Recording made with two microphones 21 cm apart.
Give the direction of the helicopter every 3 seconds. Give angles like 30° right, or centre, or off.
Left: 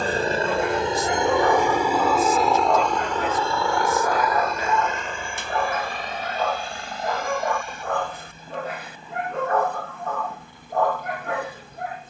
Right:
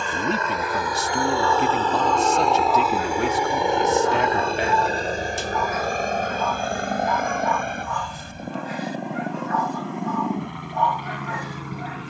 20° left, 30° right, 50° right, 60° right.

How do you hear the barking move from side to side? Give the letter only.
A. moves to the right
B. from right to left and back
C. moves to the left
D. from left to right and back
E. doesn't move
E.